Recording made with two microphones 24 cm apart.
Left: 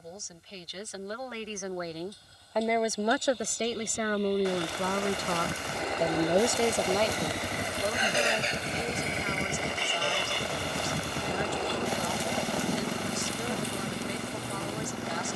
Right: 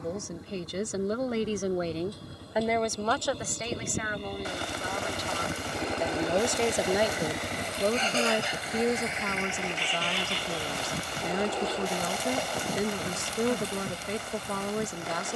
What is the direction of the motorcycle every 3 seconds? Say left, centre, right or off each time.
right, right, centre, left, left.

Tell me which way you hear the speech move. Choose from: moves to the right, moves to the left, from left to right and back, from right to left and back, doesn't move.
from right to left and back.